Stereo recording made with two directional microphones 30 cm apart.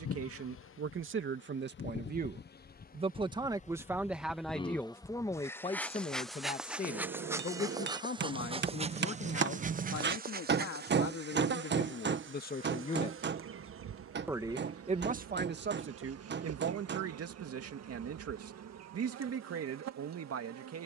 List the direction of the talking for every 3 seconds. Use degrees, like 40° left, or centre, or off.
40° right, centre, 30° left, 50° left, 10° left, 40° right, 50° right.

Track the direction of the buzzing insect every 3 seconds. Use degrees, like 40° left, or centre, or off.
40° left, 20° left, 10° right, 30° right, 40° right, 50° right, 60° right.